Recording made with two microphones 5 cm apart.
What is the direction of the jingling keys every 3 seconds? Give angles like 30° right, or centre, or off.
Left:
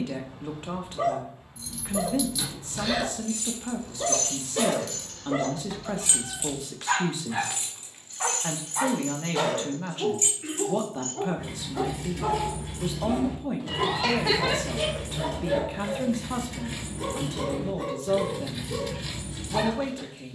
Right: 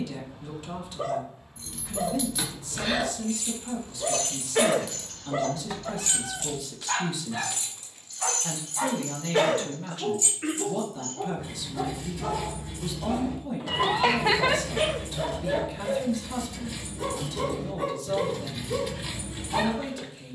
30° right, 10° right, 30° left, 60° left, 70° left, 50° left, centre.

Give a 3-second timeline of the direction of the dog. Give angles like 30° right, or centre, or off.
70° left, 70° left, 50° left, 40° left, 20° left, centre, 20° right.